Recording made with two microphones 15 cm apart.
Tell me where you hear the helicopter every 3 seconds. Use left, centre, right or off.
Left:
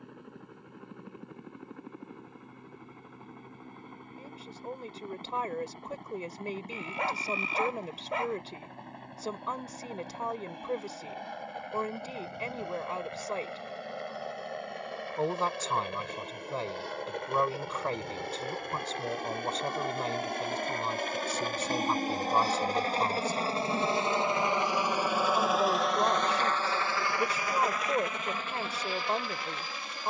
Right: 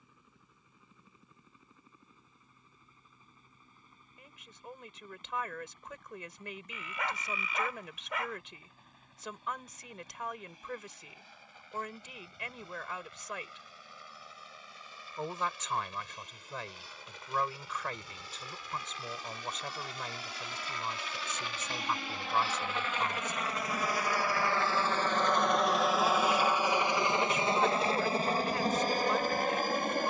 left, left, left, left, left, left, left, left, centre, right.